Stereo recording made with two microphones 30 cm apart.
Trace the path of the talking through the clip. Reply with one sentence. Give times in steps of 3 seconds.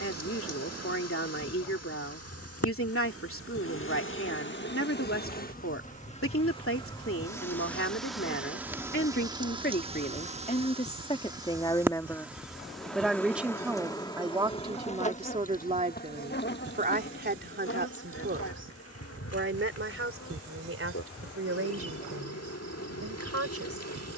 You can hear the talking on the left from 0 s, in the centre from 12 s and on the right from 15 s.